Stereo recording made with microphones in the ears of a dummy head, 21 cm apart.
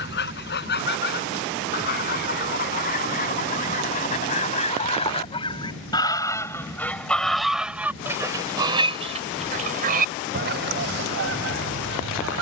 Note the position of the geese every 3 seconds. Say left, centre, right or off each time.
left, left, centre, right.